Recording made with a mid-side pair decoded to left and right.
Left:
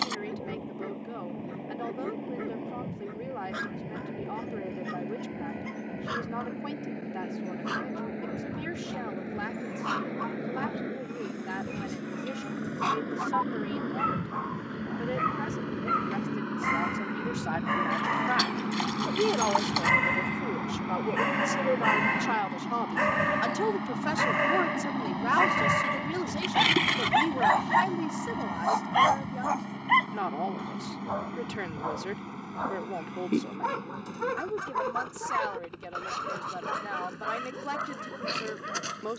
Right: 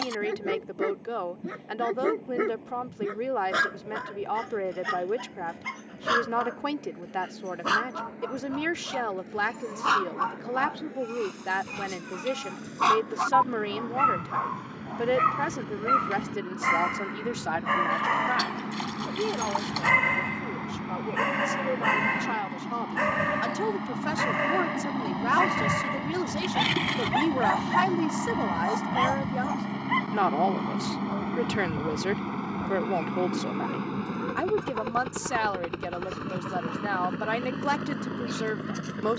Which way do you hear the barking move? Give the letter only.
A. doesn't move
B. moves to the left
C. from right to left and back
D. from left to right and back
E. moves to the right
B.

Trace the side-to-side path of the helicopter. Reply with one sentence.
You can hear the helicopter travel towards the right.